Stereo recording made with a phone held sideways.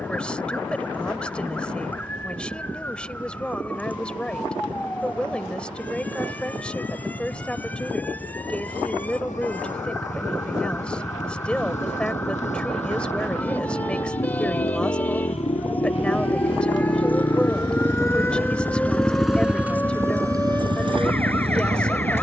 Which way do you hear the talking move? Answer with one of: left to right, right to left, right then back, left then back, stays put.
stays put.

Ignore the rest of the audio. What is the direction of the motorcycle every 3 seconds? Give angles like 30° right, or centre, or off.
70° left, 70° left, 70° left, 70° left, 60° left, 40° left, 10° right, 50° right.